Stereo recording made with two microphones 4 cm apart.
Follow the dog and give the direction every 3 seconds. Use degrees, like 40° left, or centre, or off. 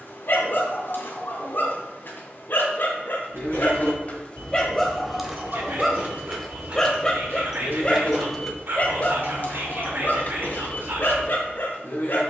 60° left, 20° left, 20° left, 50° left.